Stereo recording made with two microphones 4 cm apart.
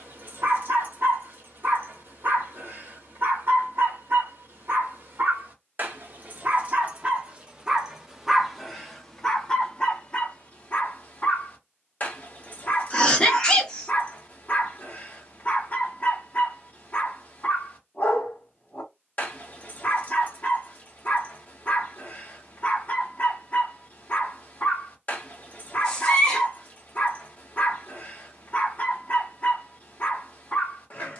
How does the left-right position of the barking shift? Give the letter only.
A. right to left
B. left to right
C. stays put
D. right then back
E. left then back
A.